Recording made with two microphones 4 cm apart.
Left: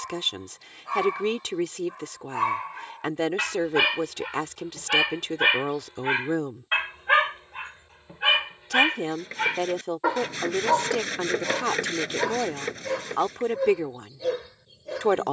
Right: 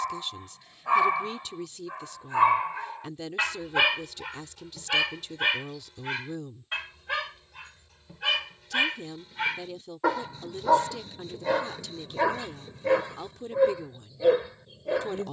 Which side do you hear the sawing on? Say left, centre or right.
left.